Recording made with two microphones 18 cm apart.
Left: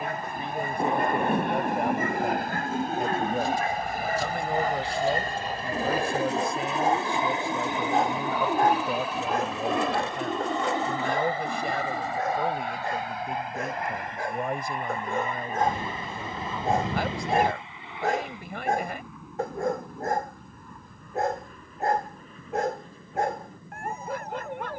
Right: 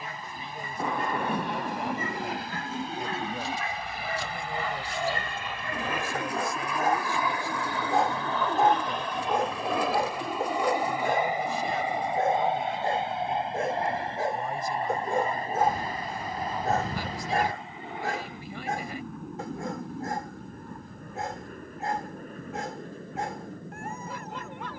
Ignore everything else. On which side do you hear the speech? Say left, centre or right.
left.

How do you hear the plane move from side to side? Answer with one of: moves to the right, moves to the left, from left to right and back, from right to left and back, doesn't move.
moves to the right.